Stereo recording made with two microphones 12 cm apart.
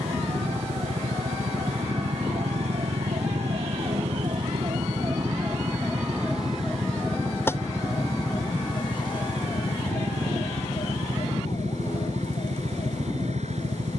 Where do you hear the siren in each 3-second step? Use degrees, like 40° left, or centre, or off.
70° right, 40° right, 20° left, 50° left, 60° left.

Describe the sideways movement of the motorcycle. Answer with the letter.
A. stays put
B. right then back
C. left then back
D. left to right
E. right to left
A.